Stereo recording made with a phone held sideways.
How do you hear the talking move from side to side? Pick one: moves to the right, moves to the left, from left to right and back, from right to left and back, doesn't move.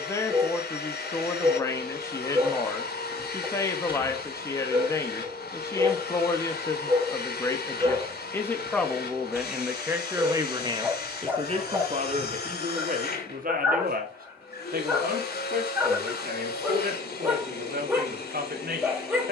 moves to the right.